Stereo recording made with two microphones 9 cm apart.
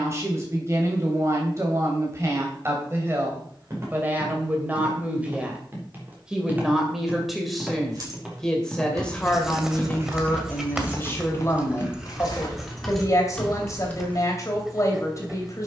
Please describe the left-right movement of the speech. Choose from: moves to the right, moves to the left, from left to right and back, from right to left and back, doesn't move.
moves to the left.